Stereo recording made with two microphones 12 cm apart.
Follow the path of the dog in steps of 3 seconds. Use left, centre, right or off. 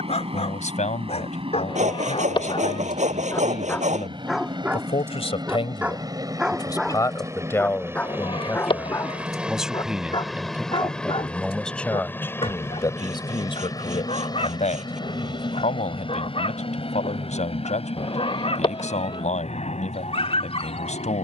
left, centre, centre, left, left, left, left.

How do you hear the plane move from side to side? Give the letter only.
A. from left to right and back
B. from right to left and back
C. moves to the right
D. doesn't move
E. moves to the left
E.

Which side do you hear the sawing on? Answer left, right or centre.
right.